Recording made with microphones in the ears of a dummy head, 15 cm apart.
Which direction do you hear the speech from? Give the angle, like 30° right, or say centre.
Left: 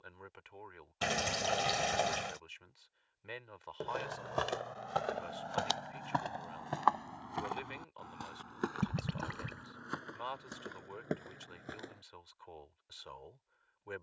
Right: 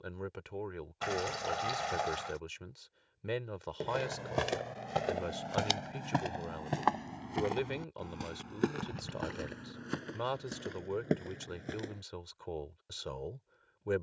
60° right.